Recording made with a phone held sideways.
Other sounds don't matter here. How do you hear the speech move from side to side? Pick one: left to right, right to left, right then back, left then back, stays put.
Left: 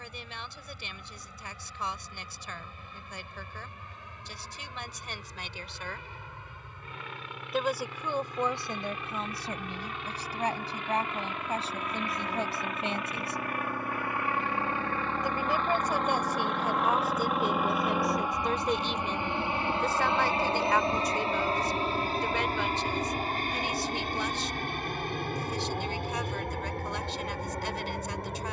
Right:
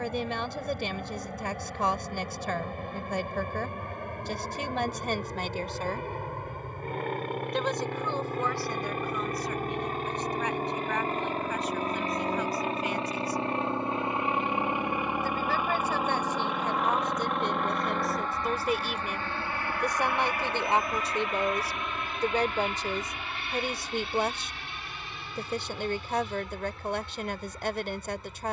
left then back.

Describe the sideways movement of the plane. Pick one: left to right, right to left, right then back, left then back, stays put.
right to left.